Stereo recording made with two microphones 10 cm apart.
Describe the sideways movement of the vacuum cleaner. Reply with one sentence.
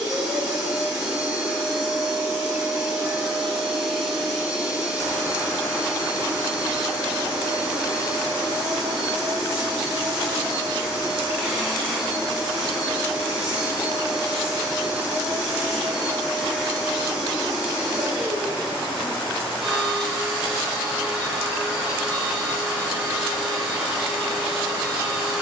You can hear the vacuum cleaner stay in one place.